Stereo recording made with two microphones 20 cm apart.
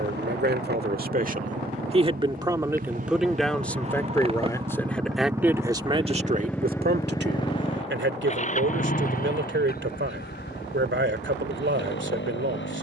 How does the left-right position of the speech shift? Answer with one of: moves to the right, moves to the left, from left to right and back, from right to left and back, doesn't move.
from right to left and back.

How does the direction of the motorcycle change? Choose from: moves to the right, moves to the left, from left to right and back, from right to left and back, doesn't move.
moves to the left.